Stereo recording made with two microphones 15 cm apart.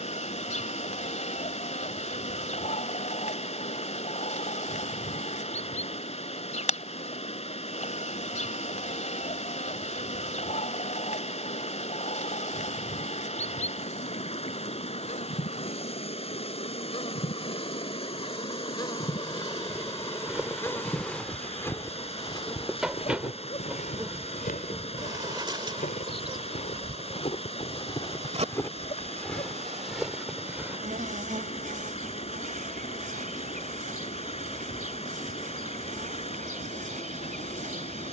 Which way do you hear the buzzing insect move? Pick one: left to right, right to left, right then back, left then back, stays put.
left to right.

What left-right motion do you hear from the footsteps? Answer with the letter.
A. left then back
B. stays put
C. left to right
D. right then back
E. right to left
A.